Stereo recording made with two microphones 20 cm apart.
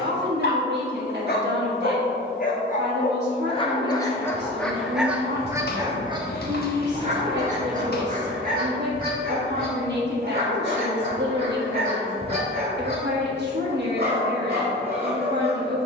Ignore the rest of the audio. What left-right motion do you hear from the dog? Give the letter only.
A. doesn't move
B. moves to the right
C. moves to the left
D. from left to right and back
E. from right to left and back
B.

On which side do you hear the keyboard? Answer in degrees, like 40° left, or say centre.
60° left.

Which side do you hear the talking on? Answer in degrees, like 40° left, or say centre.
60° right.